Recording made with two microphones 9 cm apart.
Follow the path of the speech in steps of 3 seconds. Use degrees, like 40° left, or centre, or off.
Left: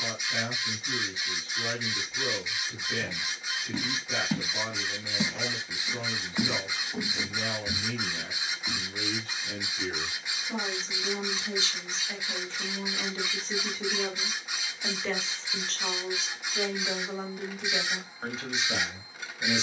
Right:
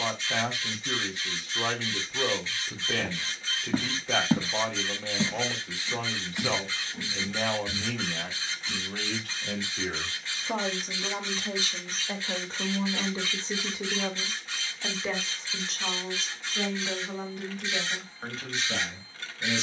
80° right, 80° right, 80° right, 60° right, 30° right, centre, 10° left.